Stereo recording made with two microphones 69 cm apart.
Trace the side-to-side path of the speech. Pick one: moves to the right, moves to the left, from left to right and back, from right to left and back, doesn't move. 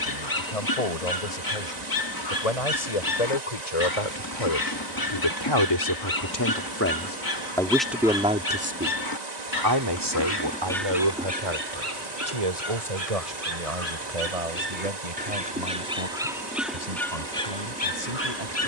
moves to the right.